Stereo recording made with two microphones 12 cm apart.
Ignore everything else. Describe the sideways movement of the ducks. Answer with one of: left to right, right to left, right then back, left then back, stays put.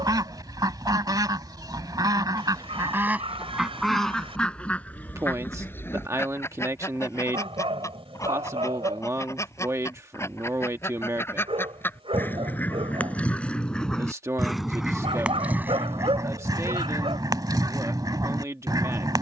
left then back.